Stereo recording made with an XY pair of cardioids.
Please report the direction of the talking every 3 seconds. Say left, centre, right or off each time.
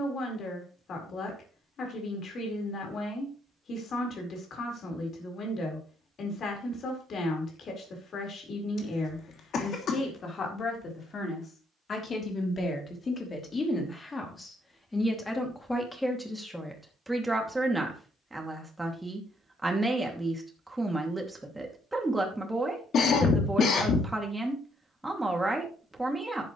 left, left, left, left, left, centre, centre, centre, centre.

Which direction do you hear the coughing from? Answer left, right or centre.
left.